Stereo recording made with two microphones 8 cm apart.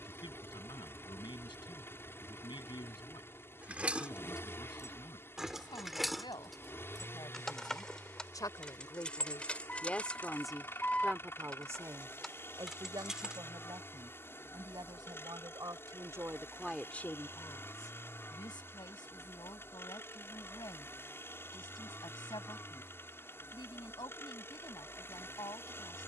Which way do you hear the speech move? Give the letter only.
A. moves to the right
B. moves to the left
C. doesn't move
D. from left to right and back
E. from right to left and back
D.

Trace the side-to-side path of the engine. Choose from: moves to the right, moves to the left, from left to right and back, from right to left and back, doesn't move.
doesn't move.